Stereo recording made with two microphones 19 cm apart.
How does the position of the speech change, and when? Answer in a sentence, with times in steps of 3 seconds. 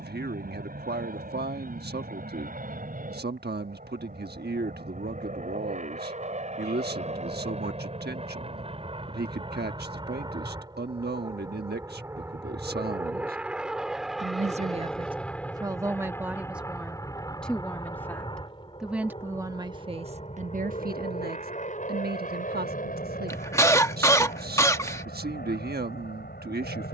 In this clip you hear the speech on the right from 0 s, in the centre from 15 s and on the right from 18 s.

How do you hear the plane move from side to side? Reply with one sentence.
You can hear the plane move from right to left.